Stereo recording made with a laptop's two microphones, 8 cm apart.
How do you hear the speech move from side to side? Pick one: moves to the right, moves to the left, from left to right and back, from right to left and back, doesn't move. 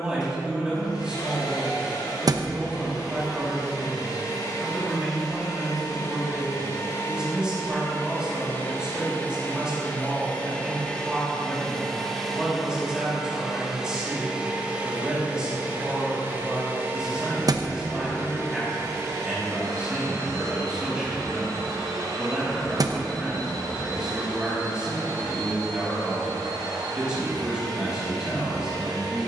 doesn't move.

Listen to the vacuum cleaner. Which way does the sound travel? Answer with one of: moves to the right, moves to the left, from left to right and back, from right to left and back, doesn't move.
moves to the right.